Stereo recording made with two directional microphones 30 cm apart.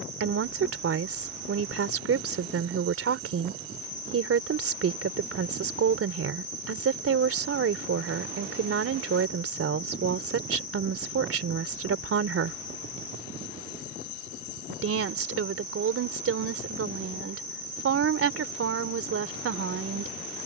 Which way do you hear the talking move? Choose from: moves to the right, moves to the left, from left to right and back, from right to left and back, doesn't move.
doesn't move.